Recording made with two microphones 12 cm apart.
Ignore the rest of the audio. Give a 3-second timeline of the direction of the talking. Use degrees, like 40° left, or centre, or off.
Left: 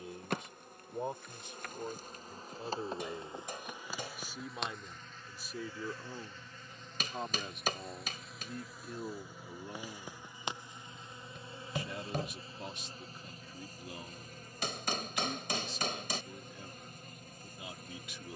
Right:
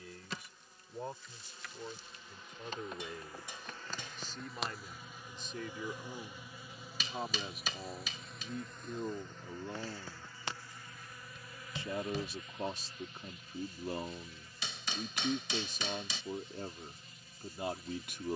20° left, 10° left, centre, 20° right, 40° right, 50° right.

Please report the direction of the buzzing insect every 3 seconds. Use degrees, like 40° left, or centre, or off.
50° left, centre, centre, 20° left, 40° left, 50° left.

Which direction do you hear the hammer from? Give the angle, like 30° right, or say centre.
50° left.